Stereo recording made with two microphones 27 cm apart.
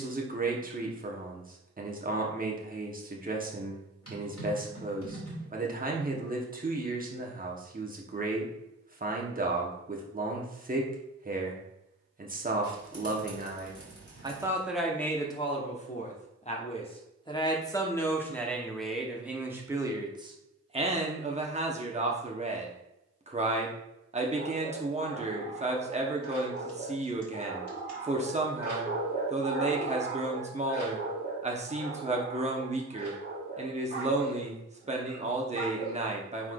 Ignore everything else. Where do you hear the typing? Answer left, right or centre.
left.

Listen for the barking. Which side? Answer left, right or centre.
left.